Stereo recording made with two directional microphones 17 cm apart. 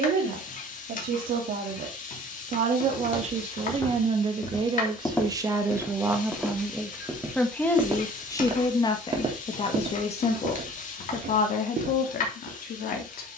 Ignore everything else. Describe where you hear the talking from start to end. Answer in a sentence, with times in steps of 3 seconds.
You can hear the talking on the right from 0 s, in the centre from 6 s and on the left from 9 s.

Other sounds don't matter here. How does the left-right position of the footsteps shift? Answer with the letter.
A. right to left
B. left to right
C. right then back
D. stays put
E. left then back
B.